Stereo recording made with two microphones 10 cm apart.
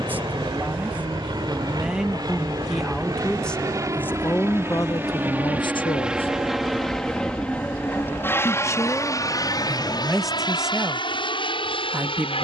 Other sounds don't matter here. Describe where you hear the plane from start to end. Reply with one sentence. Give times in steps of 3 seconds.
In this clip you hear the plane on the right from 0 s, in the centre from 6 s and on the left from 9 s.